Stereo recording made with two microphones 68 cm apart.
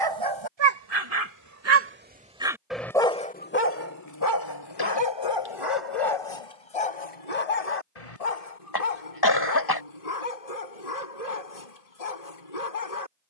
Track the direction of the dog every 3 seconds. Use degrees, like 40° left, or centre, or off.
30° right, 30° left, 60° left, 60° left, 60° left.